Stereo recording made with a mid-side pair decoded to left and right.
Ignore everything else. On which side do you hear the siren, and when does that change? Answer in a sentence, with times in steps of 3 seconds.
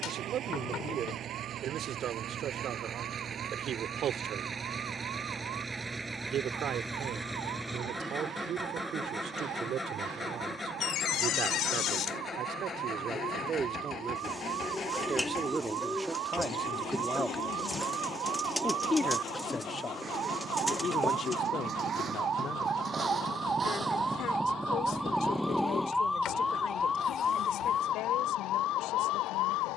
You can hear the siren on the right from 0 s, in the centre from 24 s and on the left from 27 s.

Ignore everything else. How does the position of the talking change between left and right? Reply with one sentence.
You can hear the talking travel towards the left.